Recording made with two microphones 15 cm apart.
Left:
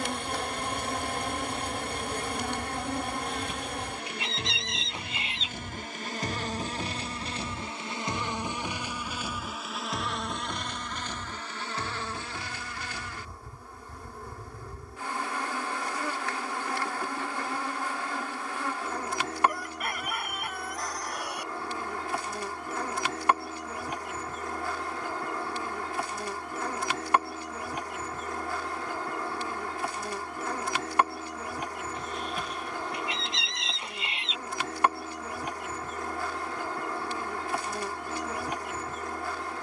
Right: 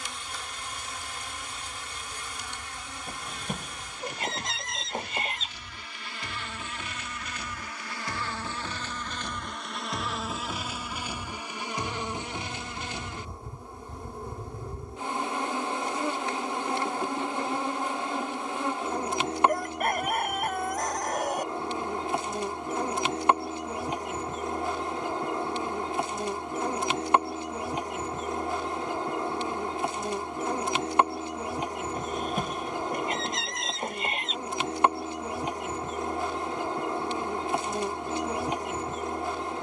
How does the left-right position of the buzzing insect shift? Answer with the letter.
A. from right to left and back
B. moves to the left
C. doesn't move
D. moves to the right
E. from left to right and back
D.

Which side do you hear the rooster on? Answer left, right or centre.
right.